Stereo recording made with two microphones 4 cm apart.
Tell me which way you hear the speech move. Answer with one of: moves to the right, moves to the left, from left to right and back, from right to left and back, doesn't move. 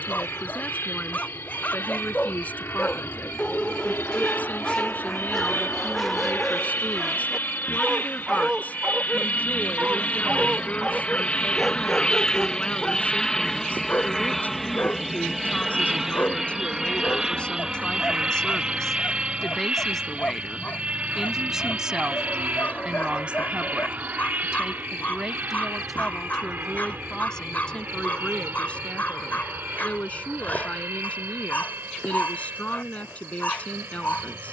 from left to right and back.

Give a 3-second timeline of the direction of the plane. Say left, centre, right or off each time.
left, left, left, left, centre, centre, right, right, right, right, right, right.